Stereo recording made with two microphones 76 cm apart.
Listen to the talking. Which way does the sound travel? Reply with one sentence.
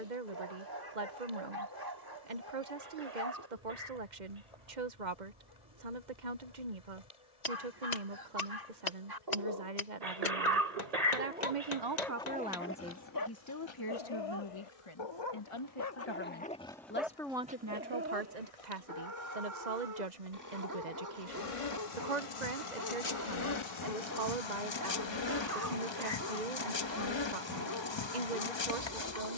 You can hear the talking move from right to left and back again.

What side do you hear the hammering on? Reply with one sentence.
You can hear the hammering on the left.